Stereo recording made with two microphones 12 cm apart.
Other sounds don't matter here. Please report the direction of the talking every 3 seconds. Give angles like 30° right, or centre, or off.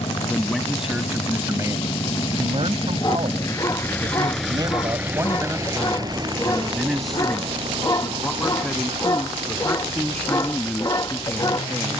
30° right, 40° right, 10° left, 10° left.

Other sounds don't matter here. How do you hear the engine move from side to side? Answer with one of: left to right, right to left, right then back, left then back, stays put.
left to right.